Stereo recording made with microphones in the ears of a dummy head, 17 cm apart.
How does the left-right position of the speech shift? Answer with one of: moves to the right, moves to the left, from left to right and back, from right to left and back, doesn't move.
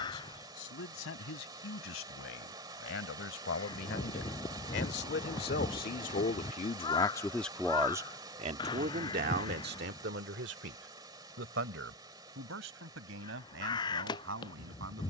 moves to the right.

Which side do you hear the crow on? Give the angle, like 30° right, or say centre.
20° left.